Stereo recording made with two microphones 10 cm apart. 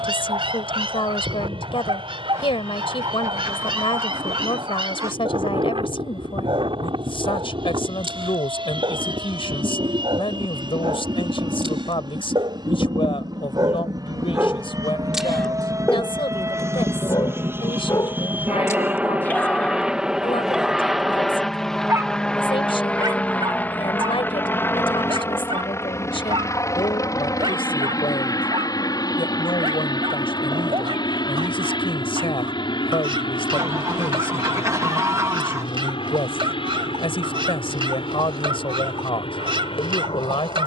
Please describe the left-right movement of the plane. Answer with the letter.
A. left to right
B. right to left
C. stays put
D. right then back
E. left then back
B.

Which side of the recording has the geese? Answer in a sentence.
In this clip you hear the geese on the right.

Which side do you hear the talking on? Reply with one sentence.
You can hear the talking on the left.